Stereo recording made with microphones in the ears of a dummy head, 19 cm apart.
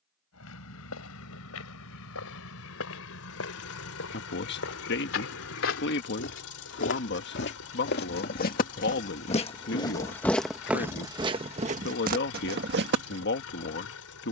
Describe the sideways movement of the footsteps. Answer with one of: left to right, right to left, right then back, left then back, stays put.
left to right.